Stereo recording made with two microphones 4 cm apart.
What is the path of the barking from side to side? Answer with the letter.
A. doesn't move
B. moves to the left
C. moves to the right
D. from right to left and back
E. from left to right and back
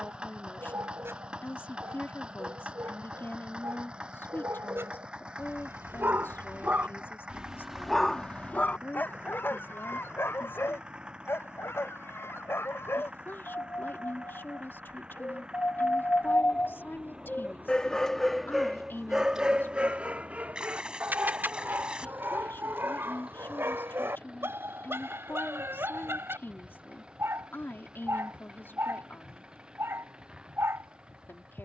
D.